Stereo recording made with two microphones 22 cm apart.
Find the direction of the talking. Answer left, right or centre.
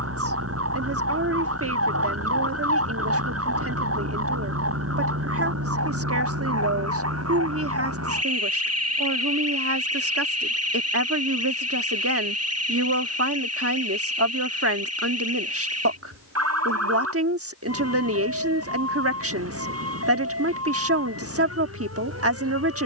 right.